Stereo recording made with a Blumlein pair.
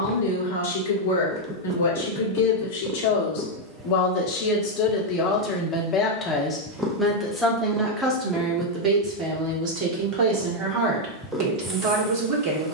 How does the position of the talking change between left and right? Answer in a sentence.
In this clip you hear the talking travel towards the right.